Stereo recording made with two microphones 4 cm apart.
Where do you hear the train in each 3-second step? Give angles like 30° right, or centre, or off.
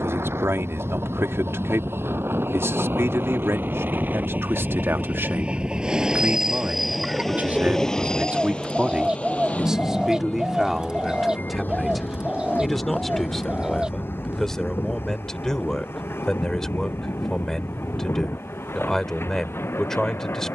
70° right, 40° right, 10° left, 40° left, 50° left, 60° left, 60° left.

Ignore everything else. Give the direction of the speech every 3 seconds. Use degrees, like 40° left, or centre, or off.
80° right, 70° right, 30° right, 10° right, 10° left, 10° left, 10° left.